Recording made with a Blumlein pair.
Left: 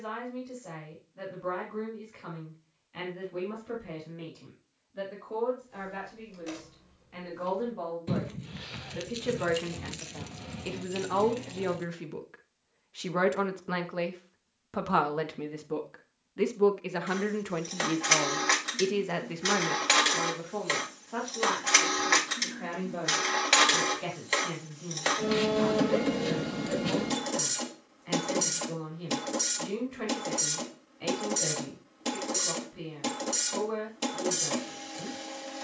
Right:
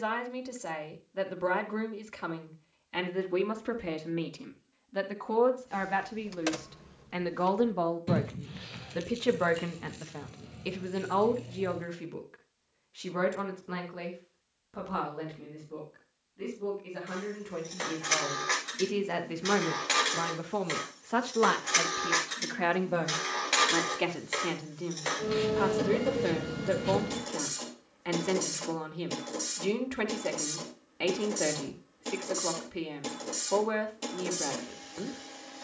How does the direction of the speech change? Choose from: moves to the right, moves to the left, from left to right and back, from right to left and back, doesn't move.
from right to left and back.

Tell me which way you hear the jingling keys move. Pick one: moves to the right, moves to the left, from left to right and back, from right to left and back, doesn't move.
moves to the left.